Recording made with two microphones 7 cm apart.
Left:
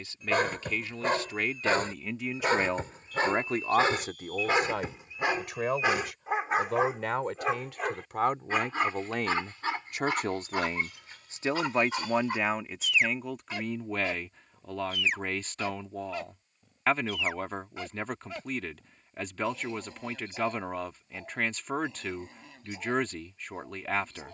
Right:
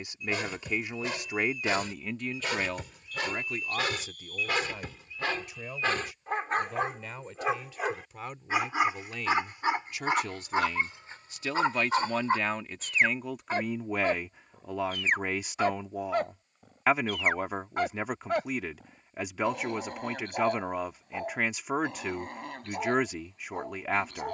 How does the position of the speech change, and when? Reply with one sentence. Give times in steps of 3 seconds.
In this clip you hear the speech in the centre from 0 s, on the left from 3 s and in the centre from 12 s.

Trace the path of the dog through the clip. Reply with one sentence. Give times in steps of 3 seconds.
In this clip you hear the dog on the left from 0 s, in the centre from 6 s and on the right from 9 s.